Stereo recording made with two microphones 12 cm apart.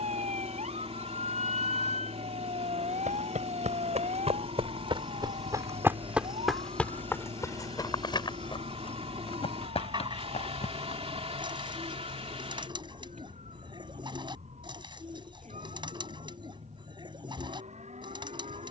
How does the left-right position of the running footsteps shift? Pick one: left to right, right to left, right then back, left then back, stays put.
right to left.